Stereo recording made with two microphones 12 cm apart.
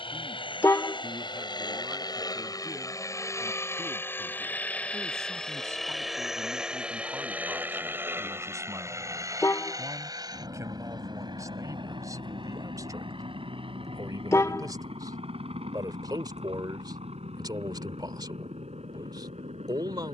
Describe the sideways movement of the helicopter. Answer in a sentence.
In this clip you hear the helicopter move from left to right.